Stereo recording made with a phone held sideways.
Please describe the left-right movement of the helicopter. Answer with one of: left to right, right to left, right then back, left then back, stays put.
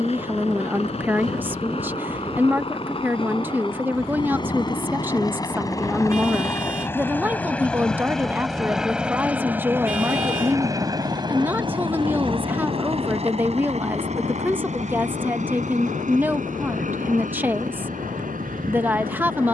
left to right.